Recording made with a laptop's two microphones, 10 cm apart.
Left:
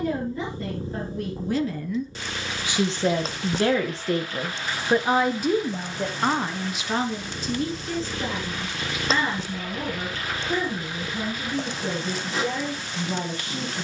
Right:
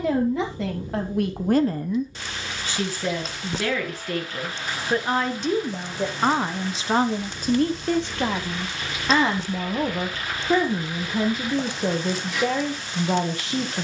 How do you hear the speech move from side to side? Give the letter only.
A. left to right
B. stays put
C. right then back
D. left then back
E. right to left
D.